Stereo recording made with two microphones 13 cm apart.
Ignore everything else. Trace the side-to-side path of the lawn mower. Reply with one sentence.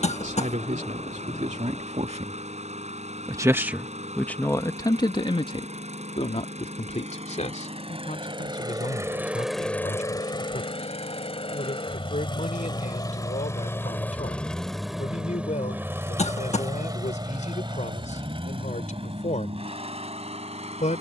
You can hear the lawn mower go left and come back.